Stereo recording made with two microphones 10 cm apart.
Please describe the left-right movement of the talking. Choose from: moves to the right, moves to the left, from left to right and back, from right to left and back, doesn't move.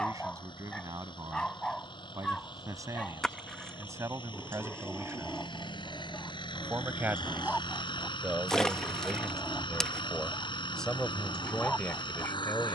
moves to the left.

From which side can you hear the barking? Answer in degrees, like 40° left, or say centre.
10° left.